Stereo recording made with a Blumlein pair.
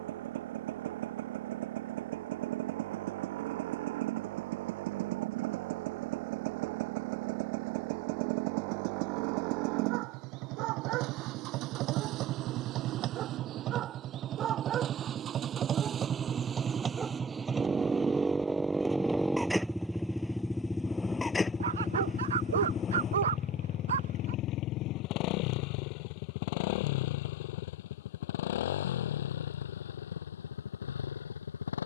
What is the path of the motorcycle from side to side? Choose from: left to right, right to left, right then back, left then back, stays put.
right to left.